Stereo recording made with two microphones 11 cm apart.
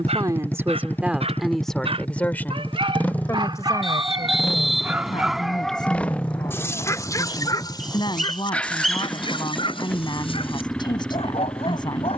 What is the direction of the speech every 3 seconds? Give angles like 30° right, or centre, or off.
10° right, 30° left, 40° left, 40° left.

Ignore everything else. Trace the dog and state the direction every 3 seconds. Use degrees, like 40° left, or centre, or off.
70° right, 20° right, 40° left, 60° left.